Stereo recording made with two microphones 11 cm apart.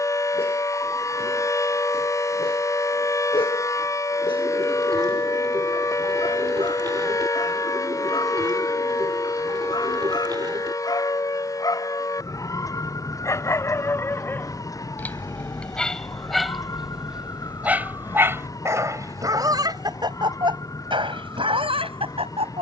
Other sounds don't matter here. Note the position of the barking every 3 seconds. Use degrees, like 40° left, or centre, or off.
60° left, 50° left, 50° left, 40° left, 20° left, centre, 30° right, 60° right.